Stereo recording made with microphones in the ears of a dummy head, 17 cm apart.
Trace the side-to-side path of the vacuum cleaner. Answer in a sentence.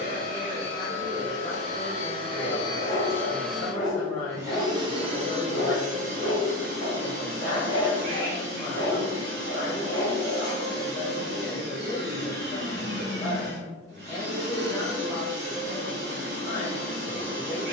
You can hear the vacuum cleaner move to the right.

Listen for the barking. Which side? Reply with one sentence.
You can hear the barking on the left.